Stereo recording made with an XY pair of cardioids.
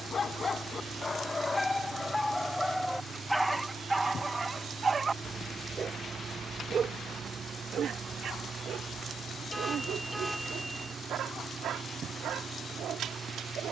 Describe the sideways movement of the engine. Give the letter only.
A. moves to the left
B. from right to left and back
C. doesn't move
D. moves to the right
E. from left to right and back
C.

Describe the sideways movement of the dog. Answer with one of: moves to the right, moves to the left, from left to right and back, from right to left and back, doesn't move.
moves to the right.